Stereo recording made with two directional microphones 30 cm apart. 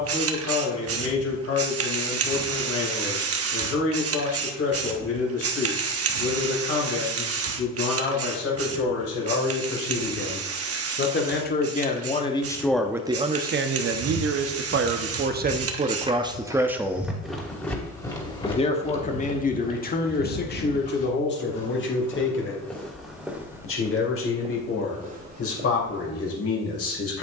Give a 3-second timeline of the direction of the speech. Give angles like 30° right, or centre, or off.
50° left, 50° left, 50° left, 40° left, 20° right, 20° right, 30° left, 40° left, 50° left.